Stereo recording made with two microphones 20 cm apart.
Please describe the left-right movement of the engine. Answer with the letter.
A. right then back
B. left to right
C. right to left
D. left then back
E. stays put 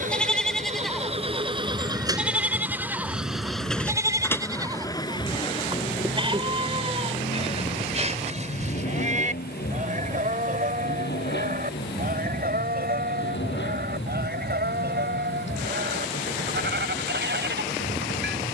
C.